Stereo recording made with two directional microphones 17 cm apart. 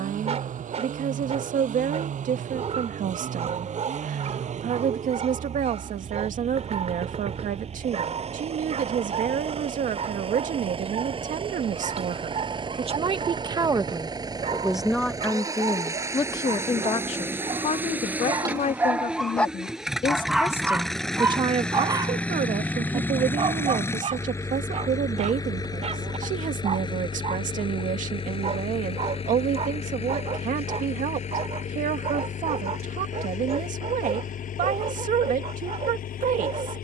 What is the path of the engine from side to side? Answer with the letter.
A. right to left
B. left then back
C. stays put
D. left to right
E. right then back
A.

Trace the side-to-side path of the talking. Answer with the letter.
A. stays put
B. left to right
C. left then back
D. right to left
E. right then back
C.